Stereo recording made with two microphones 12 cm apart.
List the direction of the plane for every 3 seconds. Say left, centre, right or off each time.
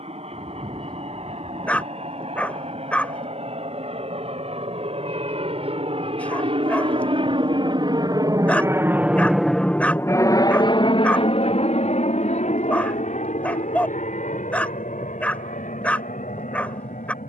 right, right, right, left, left, left.